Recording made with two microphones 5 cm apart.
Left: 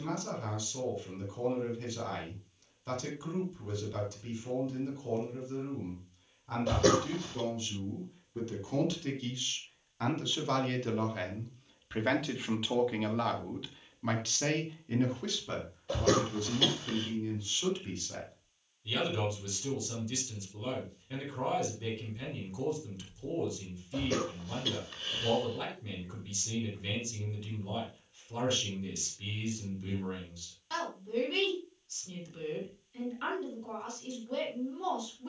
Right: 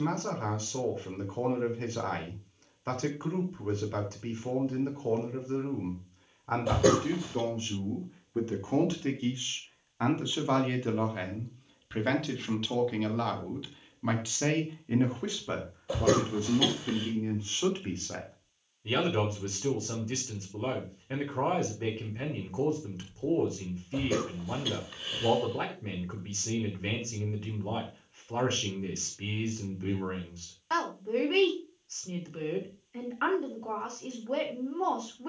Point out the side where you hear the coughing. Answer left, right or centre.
centre.